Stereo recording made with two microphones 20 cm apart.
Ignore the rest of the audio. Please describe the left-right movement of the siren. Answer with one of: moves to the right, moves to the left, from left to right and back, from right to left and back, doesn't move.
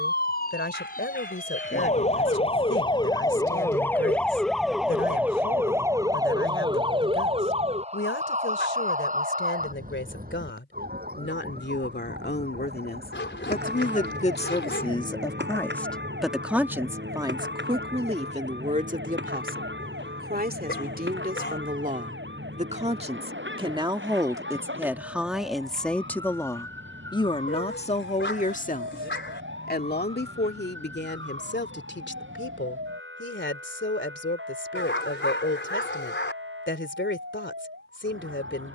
moves to the right.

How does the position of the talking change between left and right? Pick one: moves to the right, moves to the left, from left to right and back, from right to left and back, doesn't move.
from left to right and back.